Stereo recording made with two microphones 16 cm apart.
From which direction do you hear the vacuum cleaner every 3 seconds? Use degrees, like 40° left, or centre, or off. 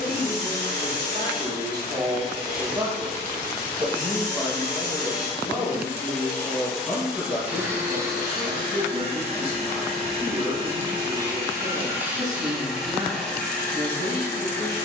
20° left, 20° left, 10° right, 30° right, 10° left.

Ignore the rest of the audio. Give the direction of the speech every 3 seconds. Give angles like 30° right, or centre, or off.
20° right, 10° left, 10° left, 20° right, 20° right.